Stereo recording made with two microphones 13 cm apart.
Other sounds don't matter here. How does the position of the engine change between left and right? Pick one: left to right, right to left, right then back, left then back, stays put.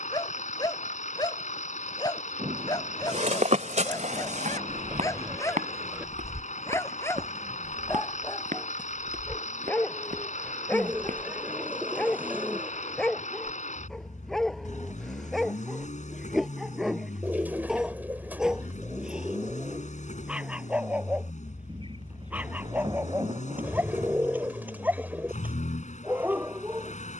stays put.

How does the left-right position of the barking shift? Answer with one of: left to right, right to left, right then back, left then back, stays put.
left to right.